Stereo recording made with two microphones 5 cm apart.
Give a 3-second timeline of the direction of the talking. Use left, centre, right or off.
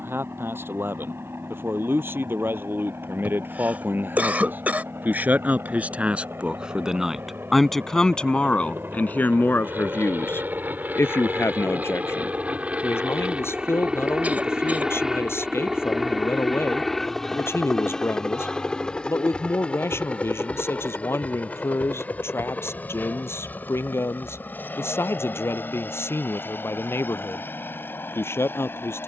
right, right, centre, left, left, left, left, left, left, left.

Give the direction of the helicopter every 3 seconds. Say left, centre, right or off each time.
right, right, right, right, right, centre, left, left, left, left.